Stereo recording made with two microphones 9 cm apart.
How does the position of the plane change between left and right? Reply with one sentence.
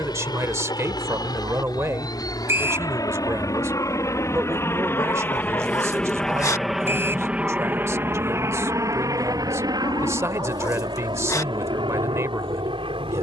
You can hear the plane go from the left side to the right.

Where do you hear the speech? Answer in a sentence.
In this clip you hear the speech on the right.